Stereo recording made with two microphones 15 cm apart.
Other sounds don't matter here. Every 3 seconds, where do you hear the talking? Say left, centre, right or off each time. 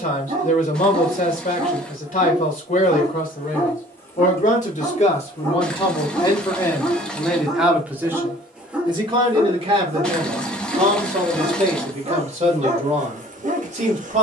left, left, centre, right, right.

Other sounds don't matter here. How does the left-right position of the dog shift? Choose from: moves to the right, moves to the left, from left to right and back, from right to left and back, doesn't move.
from right to left and back.